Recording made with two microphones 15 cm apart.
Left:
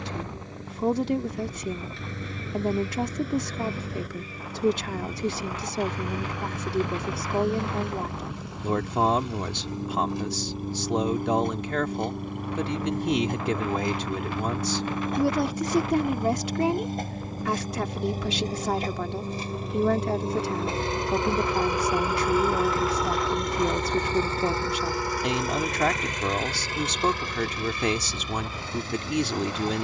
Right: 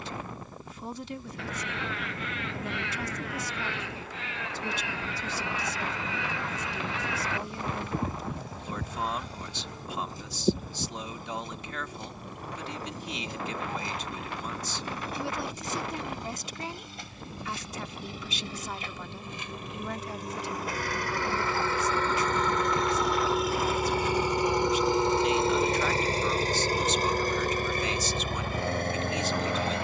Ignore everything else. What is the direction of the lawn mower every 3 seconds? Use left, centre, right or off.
left, left, left, left, left, left, left, centre, right, right.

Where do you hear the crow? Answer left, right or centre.
right.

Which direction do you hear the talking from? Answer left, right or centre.
left.